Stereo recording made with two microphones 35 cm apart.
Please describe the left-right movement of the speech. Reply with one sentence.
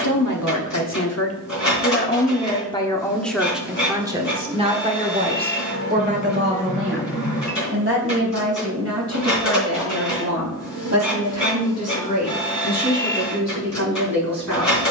In this clip you hear the speech move to the right.